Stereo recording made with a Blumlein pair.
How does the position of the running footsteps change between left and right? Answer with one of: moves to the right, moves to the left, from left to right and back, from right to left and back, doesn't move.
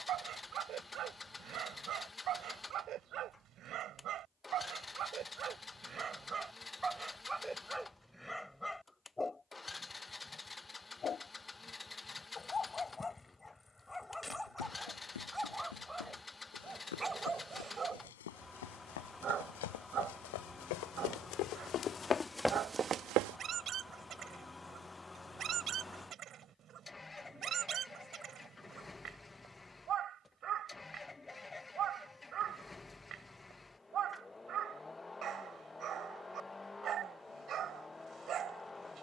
moves to the right.